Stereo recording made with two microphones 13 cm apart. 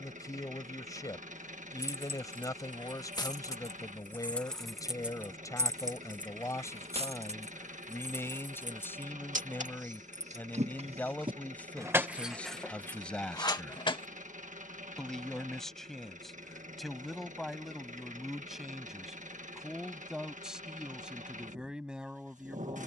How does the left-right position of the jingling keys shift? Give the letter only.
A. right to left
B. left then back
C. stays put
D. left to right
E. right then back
E.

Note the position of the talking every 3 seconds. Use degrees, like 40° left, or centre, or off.
30° left, 30° left, 20° left, 10° left, 10° left, centre, centre, 10° right.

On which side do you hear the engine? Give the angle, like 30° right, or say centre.
70° right.